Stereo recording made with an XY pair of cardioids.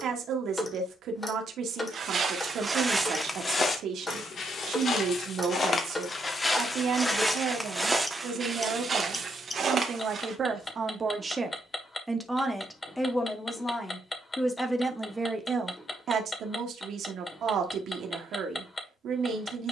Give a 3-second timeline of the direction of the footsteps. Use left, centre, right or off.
right, left, centre, right, off, off, off.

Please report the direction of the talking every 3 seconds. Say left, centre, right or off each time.
right, right, right, right, centre, right, right.